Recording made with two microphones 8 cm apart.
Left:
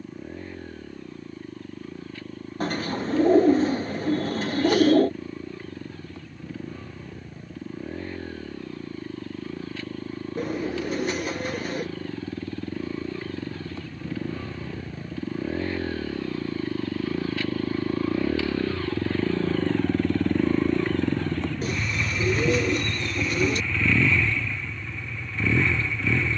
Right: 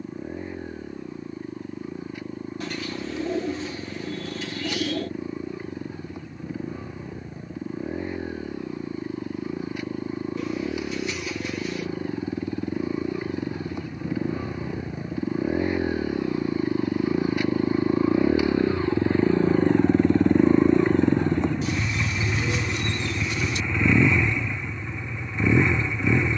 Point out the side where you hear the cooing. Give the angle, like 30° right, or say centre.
40° left.